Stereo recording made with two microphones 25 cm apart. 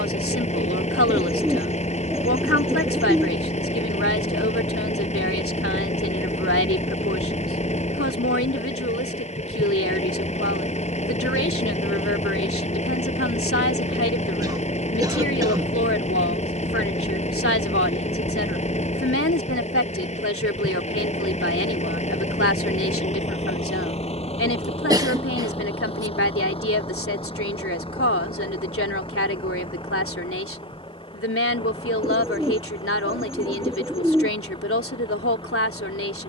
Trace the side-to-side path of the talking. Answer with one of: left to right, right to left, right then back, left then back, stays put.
stays put.